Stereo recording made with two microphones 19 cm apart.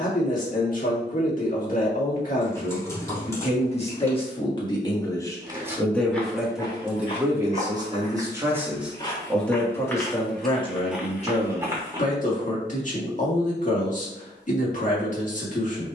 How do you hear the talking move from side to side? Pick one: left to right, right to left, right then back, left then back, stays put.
right then back.